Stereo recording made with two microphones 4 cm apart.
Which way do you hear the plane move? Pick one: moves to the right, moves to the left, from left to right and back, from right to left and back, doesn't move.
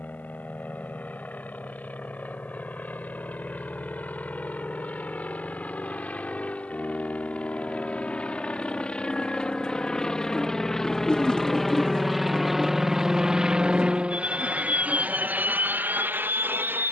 moves to the right.